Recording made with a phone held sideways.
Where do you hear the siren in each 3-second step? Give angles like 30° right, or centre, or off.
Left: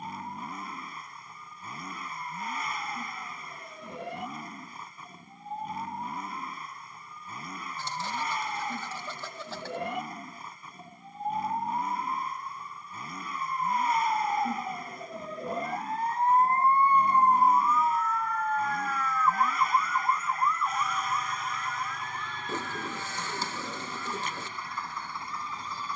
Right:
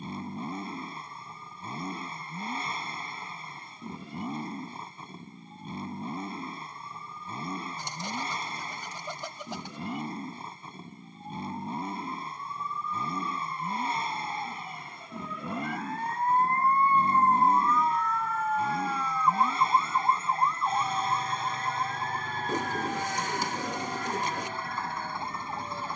80° left, 80° left, 70° left, 70° left, 50° left, 20° left, 20° right, 50° right, 60° right.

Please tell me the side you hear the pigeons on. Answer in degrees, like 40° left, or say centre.
20° right.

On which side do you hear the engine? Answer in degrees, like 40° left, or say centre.
30° right.